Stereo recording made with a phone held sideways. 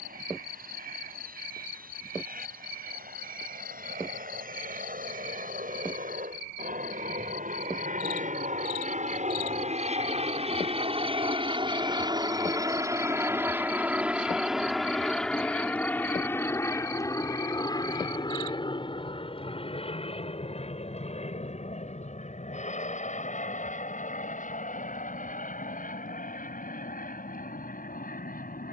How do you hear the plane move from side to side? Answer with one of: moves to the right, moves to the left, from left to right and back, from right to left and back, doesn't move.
moves to the left.